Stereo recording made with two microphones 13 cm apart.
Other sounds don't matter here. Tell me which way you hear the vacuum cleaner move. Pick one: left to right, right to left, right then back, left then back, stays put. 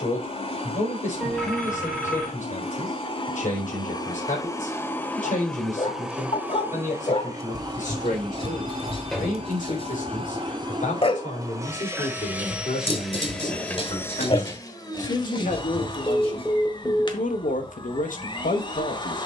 right then back.